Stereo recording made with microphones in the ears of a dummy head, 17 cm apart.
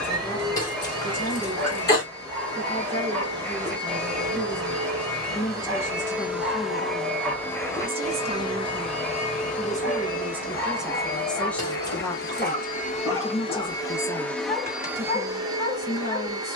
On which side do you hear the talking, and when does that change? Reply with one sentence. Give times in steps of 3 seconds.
In this clip you hear the talking on the left from 0 s, in the centre from 6 s and on the left from 12 s.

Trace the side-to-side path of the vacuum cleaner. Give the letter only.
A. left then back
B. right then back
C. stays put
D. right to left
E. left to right
A.